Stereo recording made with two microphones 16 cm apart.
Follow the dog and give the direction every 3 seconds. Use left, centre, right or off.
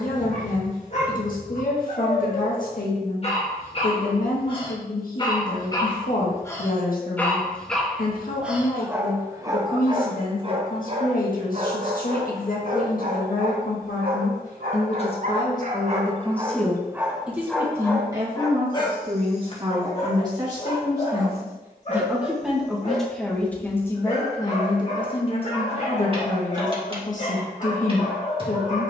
left, left, centre, right, right, right, left, left, left, left.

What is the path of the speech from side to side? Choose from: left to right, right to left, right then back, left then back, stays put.
right then back.